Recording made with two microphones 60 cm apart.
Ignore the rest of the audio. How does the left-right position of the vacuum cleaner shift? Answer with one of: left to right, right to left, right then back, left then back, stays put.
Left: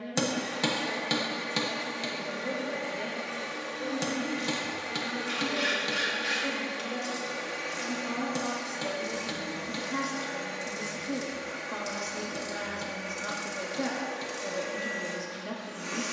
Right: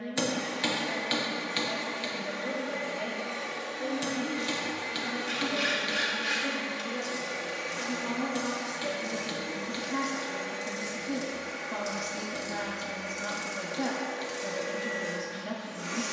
right then back.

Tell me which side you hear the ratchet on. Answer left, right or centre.
centre.